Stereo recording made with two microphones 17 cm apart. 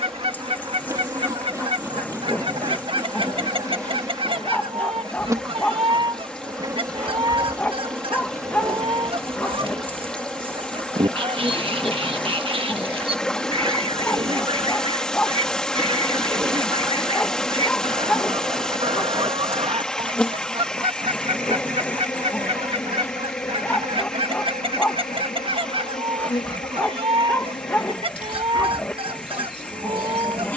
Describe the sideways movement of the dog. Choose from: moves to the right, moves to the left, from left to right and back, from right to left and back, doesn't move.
doesn't move.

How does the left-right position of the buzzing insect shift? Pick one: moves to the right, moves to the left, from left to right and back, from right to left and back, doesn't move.
moves to the left.